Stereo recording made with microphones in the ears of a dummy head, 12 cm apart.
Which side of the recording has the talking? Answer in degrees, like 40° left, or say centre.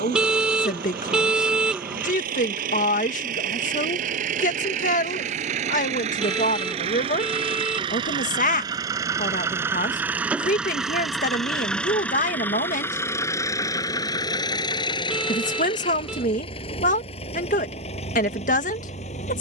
60° left.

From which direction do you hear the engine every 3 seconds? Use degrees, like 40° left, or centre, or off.
70° right, 60° right, 40° right, 10° right, 20° left, 40° left, 50° left.